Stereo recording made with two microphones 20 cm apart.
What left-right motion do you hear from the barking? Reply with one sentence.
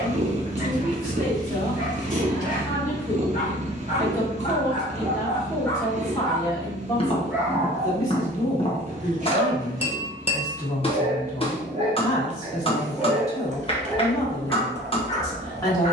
In this clip you hear the barking go right and come back.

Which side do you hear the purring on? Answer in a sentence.
In this clip you hear the purring on the right.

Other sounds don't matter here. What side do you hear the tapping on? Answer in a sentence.
In this clip you hear the tapping on the left.